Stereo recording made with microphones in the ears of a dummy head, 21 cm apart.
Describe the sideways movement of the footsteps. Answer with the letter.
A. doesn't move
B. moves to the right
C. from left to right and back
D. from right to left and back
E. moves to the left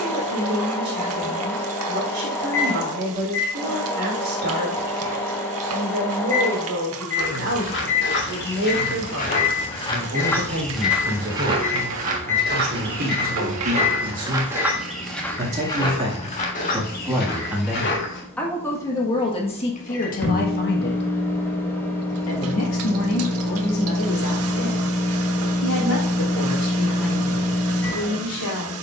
C.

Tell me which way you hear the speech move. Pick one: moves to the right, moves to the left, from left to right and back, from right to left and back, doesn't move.
moves to the left.